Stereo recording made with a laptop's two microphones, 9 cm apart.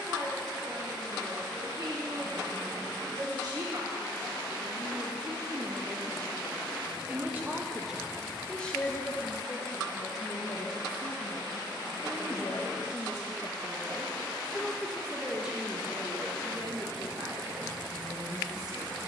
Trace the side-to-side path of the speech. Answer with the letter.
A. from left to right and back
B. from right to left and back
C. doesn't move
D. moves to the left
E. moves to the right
B.